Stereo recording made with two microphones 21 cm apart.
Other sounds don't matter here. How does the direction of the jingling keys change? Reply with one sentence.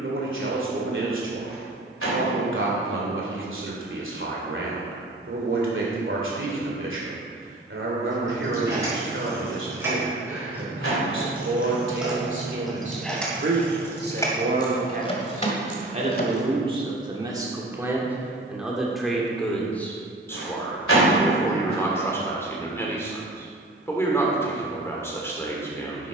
In this clip you hear the jingling keys move from right to left.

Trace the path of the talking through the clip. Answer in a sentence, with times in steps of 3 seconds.
In this clip you hear the talking on the right from 0 s and in the centre from 18 s.